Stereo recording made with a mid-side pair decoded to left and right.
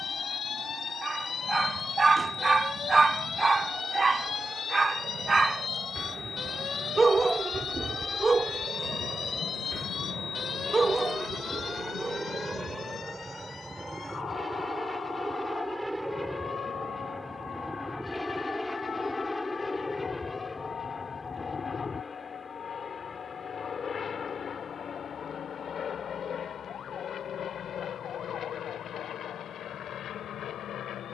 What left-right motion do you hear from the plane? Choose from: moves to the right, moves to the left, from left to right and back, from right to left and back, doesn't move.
moves to the left.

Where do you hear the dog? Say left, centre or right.
right.